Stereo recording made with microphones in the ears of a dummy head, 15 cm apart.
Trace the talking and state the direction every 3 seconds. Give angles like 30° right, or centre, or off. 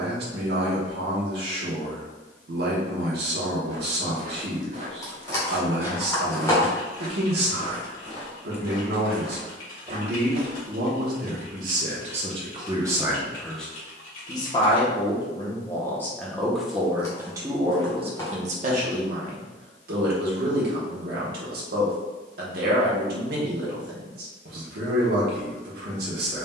60° right, 60° right, 60° right, 60° right, centre, centre, 50° right, 60° right, 60° right.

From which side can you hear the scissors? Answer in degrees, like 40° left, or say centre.
20° left.